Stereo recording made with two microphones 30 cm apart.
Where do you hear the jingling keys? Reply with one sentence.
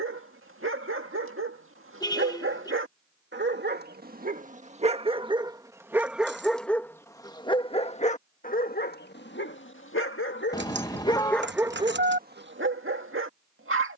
You can hear the jingling keys on the right.